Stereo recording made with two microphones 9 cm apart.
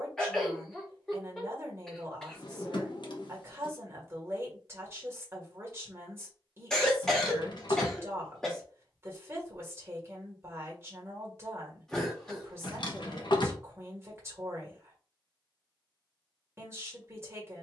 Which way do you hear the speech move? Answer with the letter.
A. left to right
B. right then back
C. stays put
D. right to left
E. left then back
C.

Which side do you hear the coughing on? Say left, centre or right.
centre.